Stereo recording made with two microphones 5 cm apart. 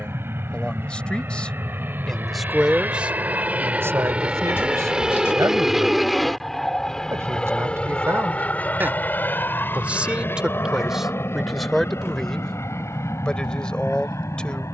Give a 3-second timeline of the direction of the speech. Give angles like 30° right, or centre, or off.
10° left, 70° right, 60° right, 10° right, 20° left.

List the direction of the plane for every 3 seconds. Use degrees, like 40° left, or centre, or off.
50° right, 20° right, 20° left, 50° left, 60° left.